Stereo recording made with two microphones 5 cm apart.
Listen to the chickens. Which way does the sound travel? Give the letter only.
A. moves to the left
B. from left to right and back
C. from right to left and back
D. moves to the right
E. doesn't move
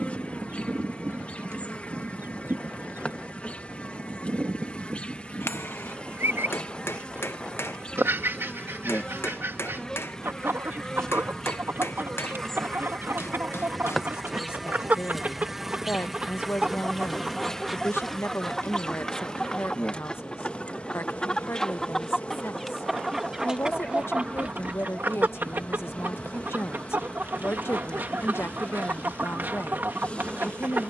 C.